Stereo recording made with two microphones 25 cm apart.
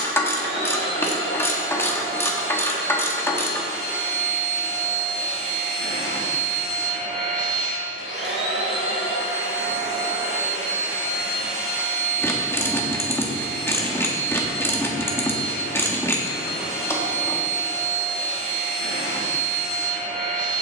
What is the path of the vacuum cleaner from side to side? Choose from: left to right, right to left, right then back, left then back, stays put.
stays put.